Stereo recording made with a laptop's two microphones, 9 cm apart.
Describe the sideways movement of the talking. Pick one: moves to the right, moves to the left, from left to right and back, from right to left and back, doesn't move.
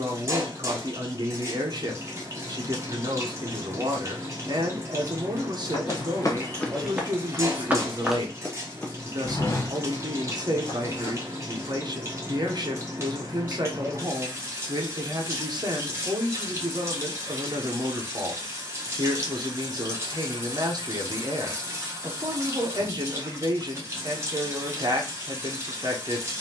doesn't move.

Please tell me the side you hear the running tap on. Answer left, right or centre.
right.